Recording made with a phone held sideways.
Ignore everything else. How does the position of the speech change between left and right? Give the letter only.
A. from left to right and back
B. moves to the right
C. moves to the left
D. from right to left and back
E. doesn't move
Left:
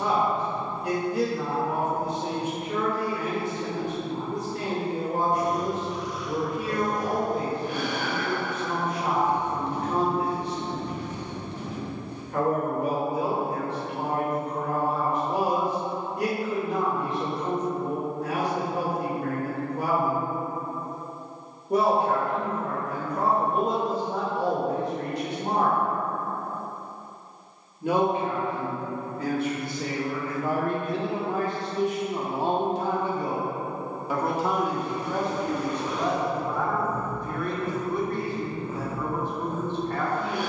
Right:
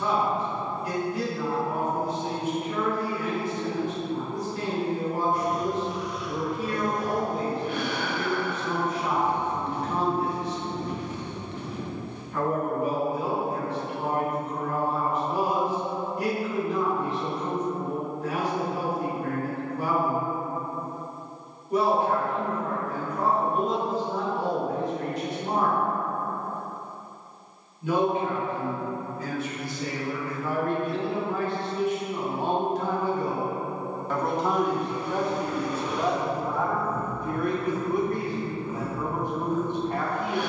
B.